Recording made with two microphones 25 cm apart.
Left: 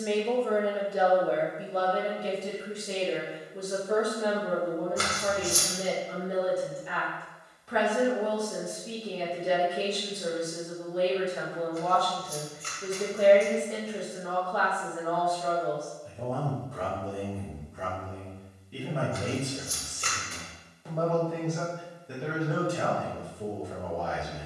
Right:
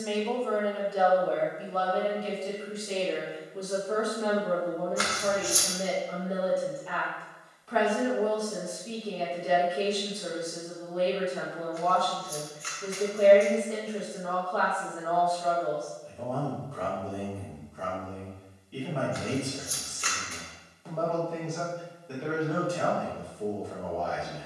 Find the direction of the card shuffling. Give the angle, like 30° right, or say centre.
40° left.